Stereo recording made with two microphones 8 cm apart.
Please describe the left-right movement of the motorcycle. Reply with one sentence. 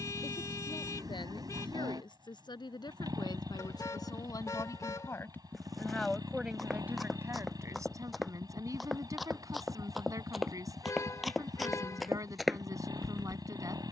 In this clip you hear the motorcycle stay in one place.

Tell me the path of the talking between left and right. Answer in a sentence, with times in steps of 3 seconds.
You can hear the talking on the left from 0 s and on the right from 6 s.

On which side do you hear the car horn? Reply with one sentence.
You can hear the car horn on the left.